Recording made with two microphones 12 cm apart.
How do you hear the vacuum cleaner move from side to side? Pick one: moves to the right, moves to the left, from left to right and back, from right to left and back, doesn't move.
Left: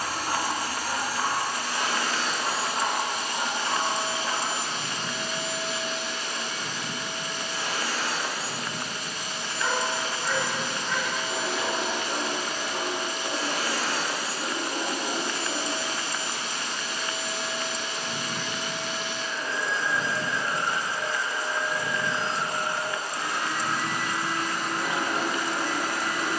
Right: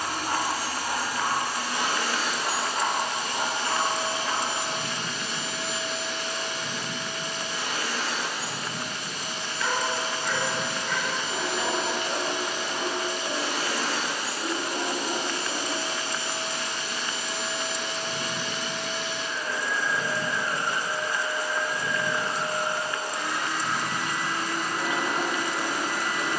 moves to the left.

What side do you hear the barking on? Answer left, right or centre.
left.